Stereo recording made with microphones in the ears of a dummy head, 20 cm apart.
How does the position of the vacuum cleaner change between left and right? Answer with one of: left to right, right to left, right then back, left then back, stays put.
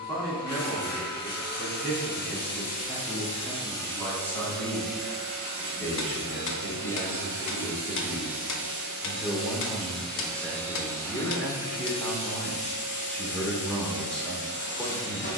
right then back.